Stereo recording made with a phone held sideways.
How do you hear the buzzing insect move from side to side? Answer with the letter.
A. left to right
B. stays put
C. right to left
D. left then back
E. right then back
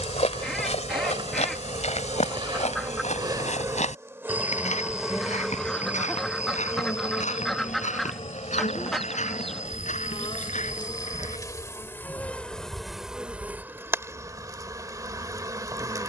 D.